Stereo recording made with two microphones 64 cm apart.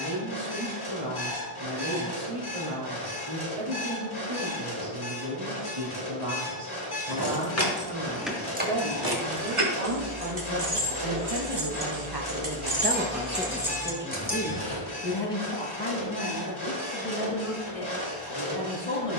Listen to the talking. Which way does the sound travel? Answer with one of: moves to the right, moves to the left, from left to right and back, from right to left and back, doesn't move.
moves to the left.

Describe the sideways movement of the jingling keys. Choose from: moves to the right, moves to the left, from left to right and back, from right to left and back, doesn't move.
from left to right and back.